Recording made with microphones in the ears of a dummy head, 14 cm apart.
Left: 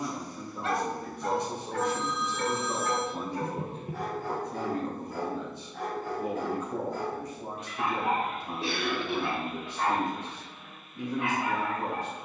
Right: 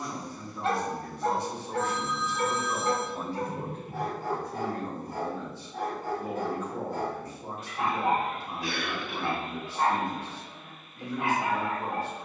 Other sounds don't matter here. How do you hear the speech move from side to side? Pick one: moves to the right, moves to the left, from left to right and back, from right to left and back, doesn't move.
doesn't move.